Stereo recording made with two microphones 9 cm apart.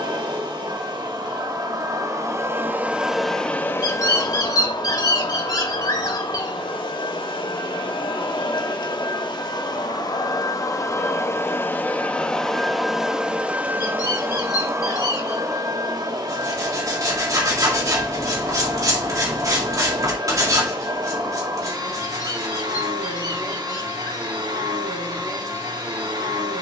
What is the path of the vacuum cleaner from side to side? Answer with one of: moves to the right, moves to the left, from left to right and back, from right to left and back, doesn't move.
from right to left and back.